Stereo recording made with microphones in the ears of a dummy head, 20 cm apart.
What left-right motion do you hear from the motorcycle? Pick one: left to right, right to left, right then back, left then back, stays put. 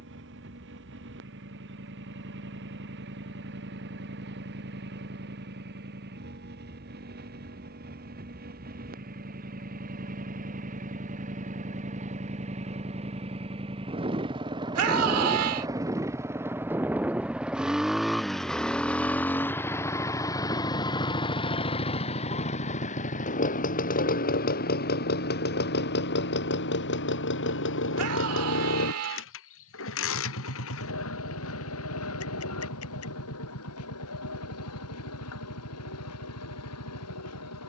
right to left.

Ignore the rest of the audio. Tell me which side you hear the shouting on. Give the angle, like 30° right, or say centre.
70° right.